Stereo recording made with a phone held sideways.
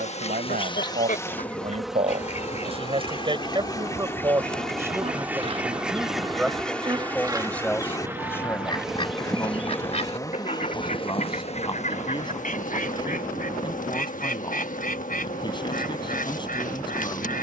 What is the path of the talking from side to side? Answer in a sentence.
In this clip you hear the talking go from the right side to the left.